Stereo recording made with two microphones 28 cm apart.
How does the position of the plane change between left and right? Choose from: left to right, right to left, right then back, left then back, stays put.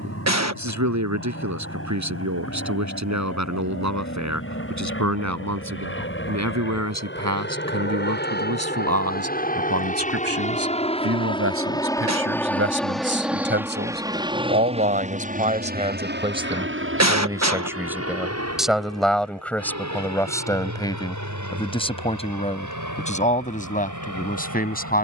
left to right.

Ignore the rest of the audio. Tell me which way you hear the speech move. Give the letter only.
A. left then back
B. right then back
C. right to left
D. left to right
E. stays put
C.